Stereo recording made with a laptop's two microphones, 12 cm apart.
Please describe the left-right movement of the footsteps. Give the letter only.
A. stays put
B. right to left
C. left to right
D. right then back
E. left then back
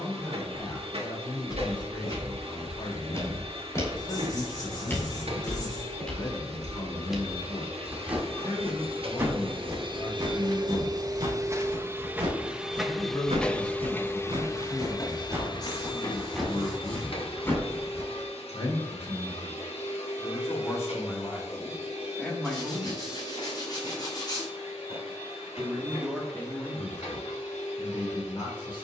D.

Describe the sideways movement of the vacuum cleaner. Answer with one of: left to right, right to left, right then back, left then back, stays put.
right to left.